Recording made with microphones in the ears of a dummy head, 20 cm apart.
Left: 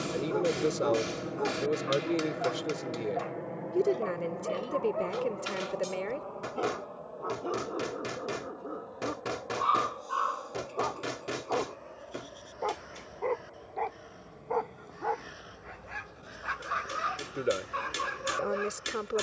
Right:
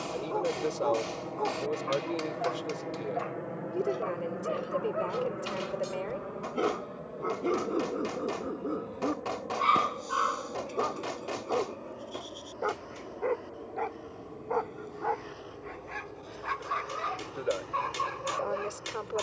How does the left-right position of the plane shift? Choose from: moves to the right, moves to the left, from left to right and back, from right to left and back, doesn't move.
moves to the right.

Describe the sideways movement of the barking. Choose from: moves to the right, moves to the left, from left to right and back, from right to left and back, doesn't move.
from left to right and back.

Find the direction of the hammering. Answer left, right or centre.
left.